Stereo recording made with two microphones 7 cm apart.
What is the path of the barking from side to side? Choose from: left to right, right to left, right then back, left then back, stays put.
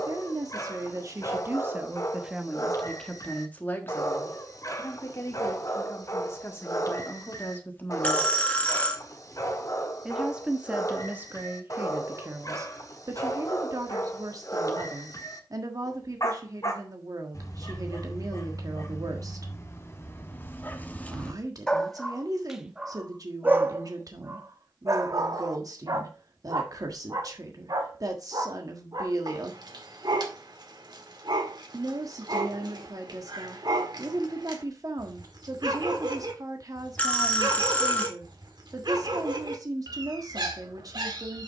left to right.